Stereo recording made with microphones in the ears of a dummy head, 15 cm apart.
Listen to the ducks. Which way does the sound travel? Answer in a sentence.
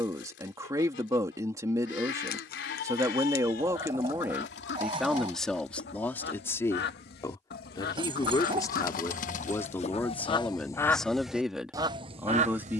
In this clip you hear the ducks move from left to right.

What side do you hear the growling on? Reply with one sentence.
In this clip you hear the growling on the right.